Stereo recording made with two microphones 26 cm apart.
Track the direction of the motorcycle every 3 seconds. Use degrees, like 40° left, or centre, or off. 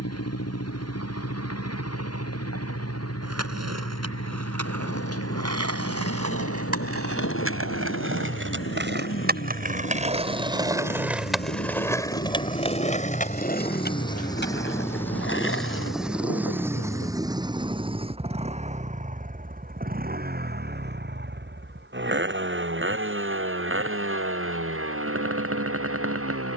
70° left, 70° left, 60° left, 50° left, 20° left, 10° right, 30° right, 50° right, 50° right.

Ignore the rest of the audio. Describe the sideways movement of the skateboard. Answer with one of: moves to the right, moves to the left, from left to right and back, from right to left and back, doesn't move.
moves to the left.